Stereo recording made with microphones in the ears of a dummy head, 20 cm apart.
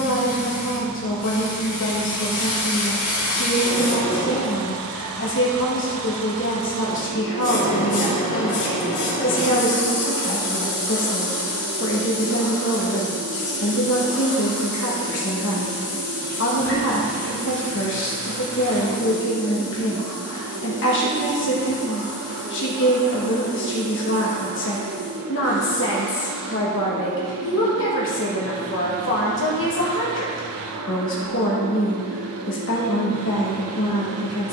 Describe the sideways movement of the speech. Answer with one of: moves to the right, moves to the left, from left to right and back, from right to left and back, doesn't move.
doesn't move.